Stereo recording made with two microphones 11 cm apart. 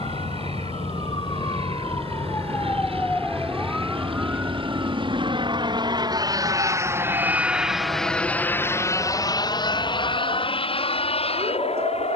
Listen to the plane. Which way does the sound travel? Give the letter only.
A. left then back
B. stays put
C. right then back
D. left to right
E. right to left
E.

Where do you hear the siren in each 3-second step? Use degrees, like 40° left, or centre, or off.
40° left, 10° right, 50° right, 60° right.